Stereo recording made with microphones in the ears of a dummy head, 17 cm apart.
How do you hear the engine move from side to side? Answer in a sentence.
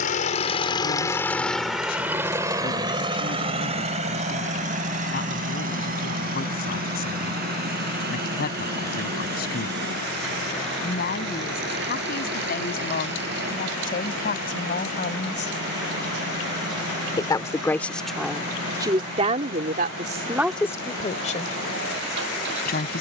You can hear the engine go from the left side to the right.